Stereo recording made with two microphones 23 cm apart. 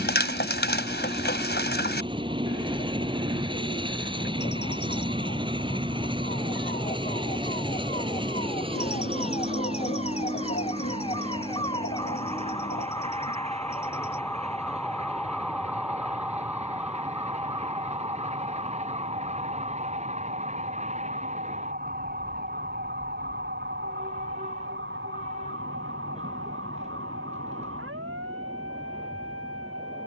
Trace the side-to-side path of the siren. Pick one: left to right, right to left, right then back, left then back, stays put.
left to right.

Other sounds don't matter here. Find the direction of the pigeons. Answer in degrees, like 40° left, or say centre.
50° left.